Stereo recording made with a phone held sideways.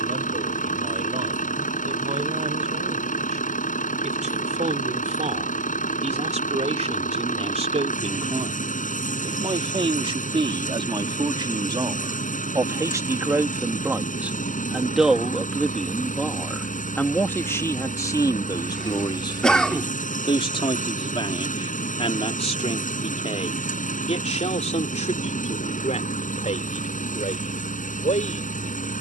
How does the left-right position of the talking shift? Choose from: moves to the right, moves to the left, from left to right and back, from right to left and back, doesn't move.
moves to the left.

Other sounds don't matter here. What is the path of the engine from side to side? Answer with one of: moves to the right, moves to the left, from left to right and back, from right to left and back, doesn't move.
doesn't move.